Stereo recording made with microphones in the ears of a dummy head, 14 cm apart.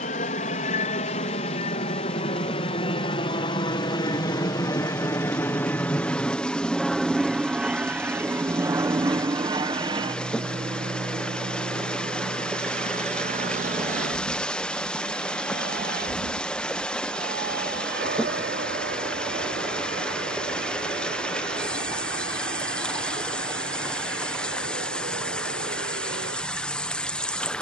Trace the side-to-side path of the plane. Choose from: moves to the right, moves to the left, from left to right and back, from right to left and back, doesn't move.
moves to the right.